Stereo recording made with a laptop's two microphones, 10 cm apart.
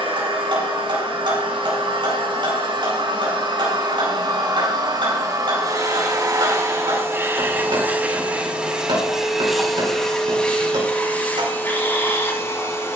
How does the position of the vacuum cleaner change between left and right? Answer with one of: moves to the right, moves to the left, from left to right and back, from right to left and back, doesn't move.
moves to the left.